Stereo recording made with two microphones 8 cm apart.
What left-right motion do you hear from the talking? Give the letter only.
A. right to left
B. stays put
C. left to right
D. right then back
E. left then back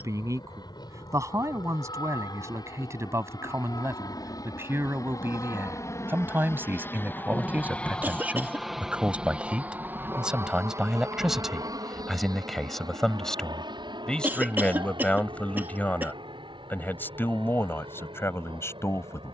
A.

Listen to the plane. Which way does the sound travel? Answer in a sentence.
You can hear the plane go from the left side to the right.